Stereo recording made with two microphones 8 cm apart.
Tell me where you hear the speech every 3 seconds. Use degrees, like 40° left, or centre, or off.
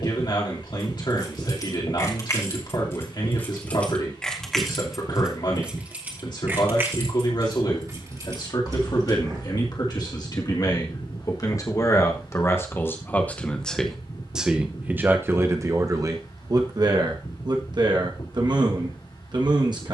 60° left, 60° left, 60° left, 50° left, 10° left, 50° right, 60° right.